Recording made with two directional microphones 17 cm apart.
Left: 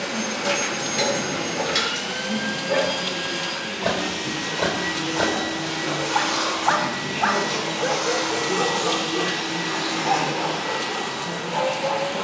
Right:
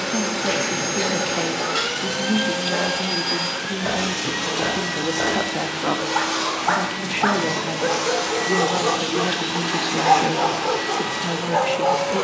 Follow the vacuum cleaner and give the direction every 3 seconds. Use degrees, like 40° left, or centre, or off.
60° right, 30° right, centre, 30° right.